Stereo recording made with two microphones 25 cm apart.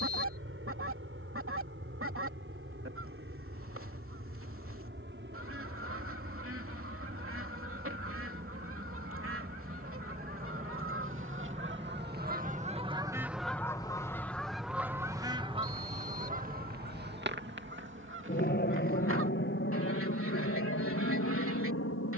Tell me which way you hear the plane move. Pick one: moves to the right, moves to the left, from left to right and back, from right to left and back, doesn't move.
moves to the left.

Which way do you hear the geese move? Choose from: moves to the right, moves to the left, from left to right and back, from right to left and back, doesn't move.
from right to left and back.